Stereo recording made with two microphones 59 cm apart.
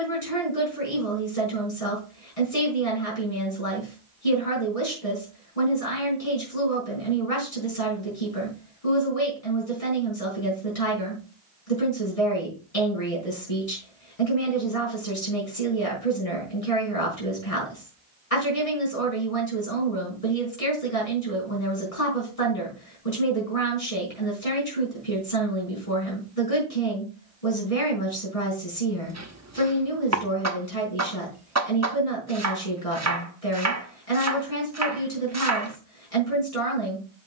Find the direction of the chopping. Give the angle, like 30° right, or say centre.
30° right.